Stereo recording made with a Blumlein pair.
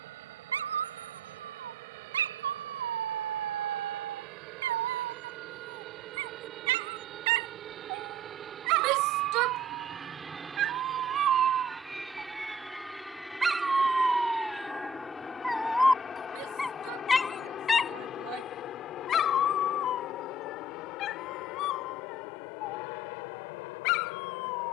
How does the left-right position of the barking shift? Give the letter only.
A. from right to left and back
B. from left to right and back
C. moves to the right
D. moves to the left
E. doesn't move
D.